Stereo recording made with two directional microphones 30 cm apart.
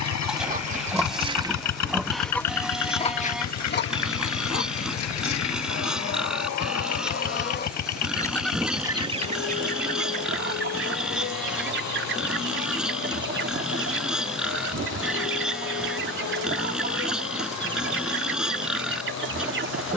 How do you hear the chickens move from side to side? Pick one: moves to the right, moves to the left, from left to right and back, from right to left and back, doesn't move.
from right to left and back.